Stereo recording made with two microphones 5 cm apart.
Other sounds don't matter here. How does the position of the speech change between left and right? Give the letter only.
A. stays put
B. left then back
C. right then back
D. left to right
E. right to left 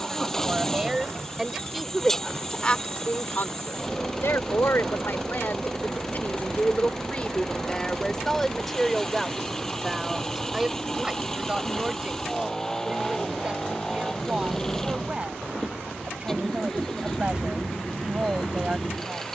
B.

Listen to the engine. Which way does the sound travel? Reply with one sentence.
In this clip you hear the engine stay in one place.